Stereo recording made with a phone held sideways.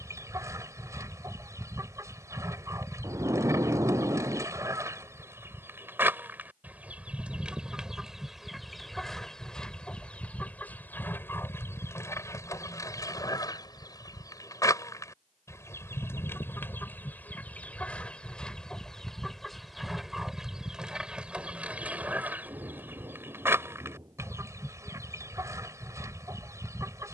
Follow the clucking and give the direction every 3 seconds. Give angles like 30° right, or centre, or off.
20° right, 20° right, 10° right, 10° left, 20° left, 10° left, centre, 10° right, 20° right.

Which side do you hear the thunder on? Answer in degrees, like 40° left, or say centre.
20° right.